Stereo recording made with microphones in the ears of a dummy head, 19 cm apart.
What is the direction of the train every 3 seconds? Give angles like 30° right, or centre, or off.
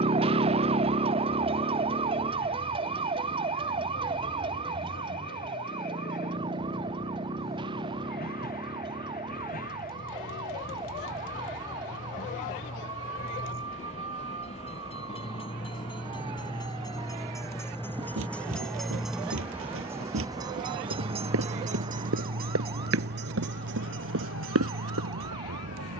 50° left, 50° left, 50° left, 40° left, 40° left, 20° left, 10° right, 50° right, 70° right.